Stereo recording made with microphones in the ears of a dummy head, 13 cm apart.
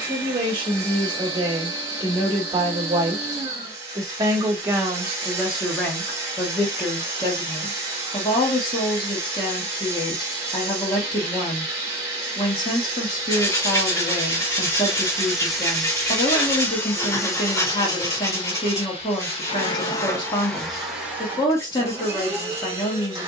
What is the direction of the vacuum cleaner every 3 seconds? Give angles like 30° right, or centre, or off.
20° right, 20° right, 20° right, 20° right, 20° right, 10° left, 30° left, 20° right.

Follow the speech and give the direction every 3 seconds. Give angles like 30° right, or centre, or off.
30° right, 10° right, 20° left, 30° left, 30° left, 30° left, 30° left, 30° left.